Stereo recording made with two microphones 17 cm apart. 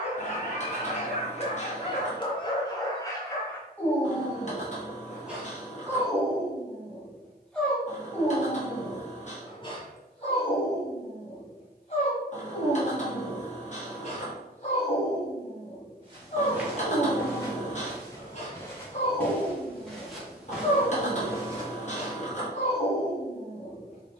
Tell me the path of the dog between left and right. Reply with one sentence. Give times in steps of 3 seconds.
In this clip you hear the dog on the left from 0 s, in the centre from 3 s and on the left from 9 s.